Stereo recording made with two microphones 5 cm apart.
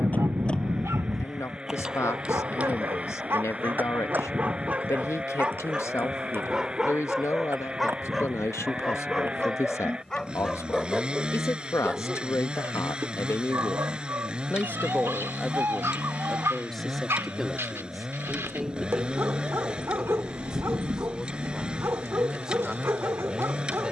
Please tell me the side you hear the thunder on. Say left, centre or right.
right.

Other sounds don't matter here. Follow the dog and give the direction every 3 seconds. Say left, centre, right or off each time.
right, right, centre, centre, right, right, right, right.